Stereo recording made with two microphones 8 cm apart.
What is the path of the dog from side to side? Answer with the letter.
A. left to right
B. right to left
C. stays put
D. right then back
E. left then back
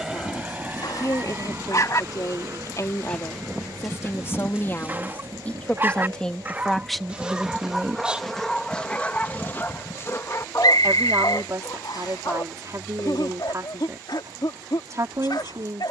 D.